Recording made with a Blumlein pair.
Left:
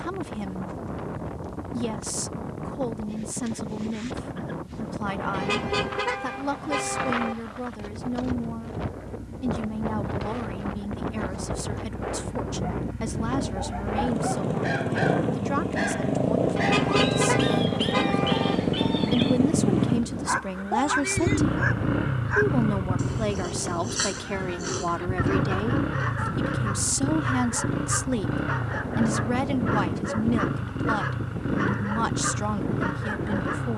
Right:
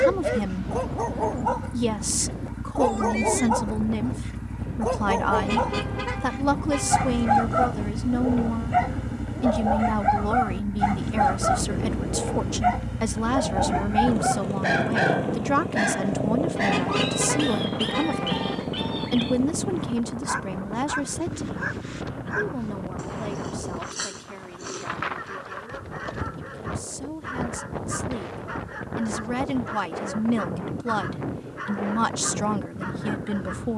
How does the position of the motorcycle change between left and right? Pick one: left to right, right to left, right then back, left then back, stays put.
right to left.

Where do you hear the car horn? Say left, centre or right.
centre.